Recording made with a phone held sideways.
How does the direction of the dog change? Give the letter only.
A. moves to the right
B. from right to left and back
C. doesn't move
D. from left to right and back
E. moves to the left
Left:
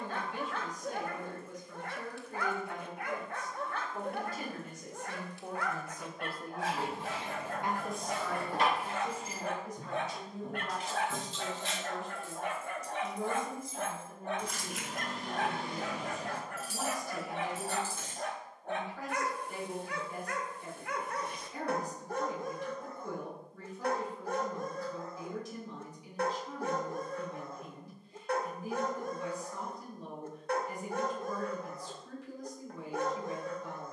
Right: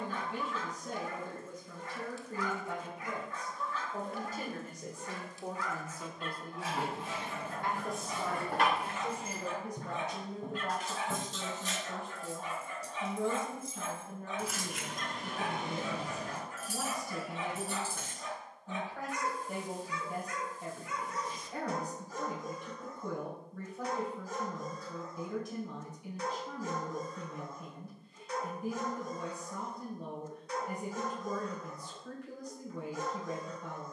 C.